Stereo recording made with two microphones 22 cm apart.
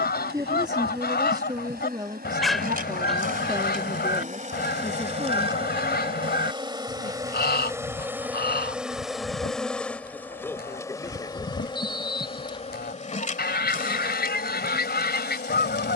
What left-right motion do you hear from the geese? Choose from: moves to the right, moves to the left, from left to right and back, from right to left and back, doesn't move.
doesn't move.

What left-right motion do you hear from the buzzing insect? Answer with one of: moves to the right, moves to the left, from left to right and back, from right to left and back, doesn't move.
moves to the left.